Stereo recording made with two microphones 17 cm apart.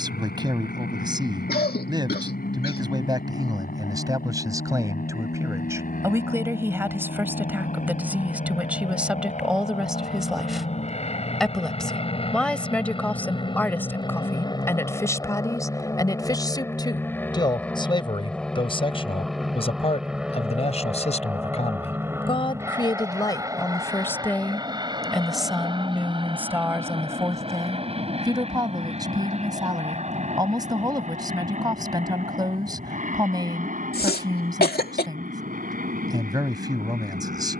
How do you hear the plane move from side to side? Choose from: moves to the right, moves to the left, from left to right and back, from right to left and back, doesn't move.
moves to the right.